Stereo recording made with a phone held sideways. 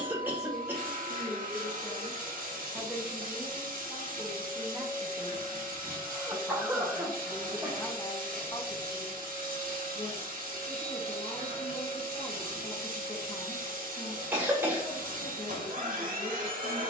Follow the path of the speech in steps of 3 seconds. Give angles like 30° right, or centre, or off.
30° left, 20° right, 20° left, 40° left, 40° left, 40° left.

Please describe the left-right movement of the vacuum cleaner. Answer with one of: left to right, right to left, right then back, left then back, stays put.
stays put.